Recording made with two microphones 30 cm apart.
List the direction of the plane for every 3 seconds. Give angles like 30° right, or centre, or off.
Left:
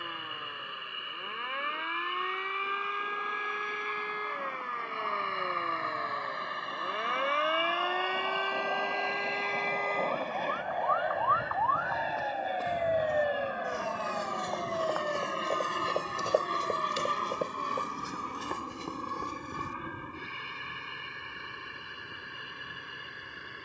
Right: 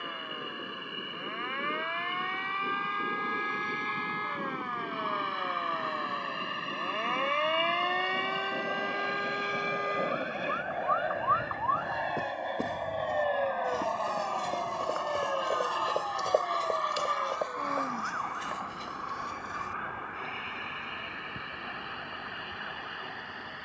60° right, 50° right, 30° right, 10° right, 10° left, 30° left, 40° left, 50° left.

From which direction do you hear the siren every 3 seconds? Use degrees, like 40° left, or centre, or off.
50° left, 30° left, 10° left, 20° right, 40° right, 60° right, 70° right, 80° right.